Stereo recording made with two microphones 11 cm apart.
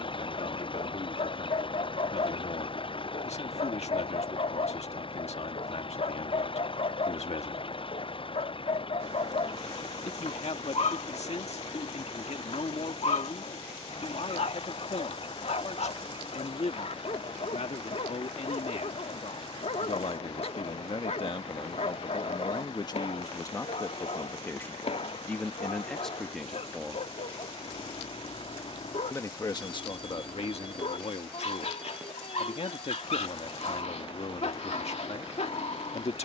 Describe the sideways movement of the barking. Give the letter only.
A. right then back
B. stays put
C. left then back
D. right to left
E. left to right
B.